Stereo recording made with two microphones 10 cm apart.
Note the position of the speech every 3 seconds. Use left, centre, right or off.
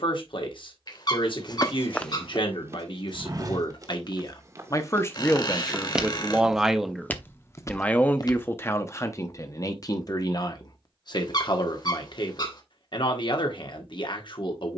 left, left, centre, left, left.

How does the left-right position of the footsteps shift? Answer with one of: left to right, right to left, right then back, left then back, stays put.
right then back.